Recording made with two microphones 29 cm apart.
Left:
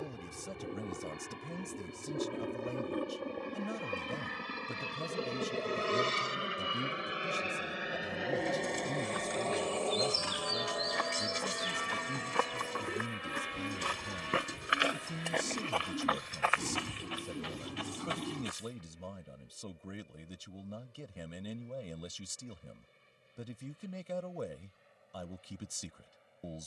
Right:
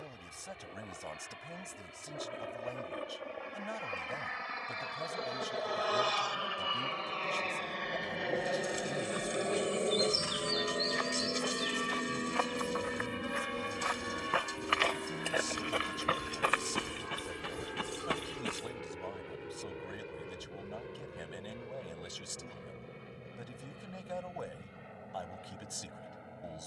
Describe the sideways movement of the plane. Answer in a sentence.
You can hear the plane travel towards the right.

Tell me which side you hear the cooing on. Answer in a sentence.
You can hear the cooing on the left.